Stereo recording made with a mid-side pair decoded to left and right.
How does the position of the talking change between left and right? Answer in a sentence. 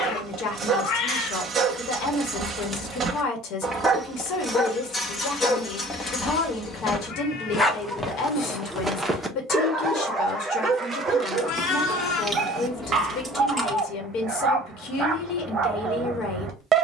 In this clip you hear the talking stay put.